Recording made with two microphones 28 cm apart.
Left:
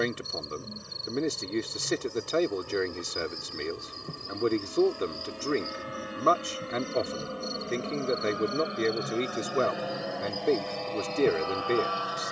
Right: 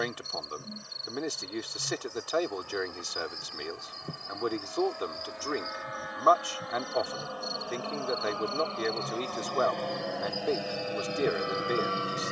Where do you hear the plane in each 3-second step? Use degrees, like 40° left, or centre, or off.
50° left, 40° left, 30° left, centre.